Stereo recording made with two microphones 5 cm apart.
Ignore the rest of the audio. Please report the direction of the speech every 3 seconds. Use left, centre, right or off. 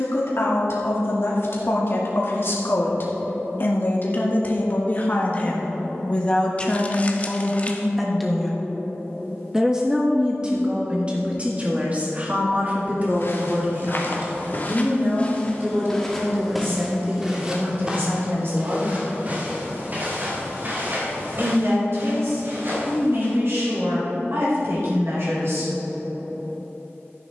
left, left, centre, right, right, right, right, right, right.